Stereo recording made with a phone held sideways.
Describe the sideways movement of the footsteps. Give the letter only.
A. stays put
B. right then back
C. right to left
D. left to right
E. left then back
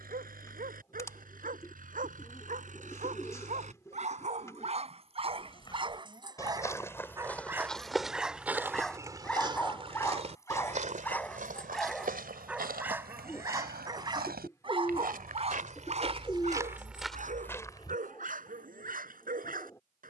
B.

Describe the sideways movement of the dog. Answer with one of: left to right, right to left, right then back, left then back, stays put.
left then back.